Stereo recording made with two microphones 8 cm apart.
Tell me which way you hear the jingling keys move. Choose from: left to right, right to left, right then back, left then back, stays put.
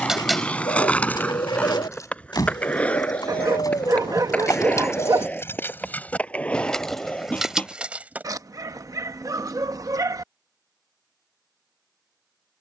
left then back.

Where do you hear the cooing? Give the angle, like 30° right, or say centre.
80° left.